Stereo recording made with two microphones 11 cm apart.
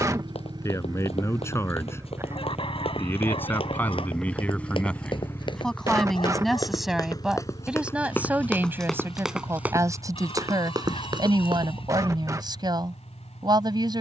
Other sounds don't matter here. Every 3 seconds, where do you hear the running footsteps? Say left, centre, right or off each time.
left, left, left, right, off.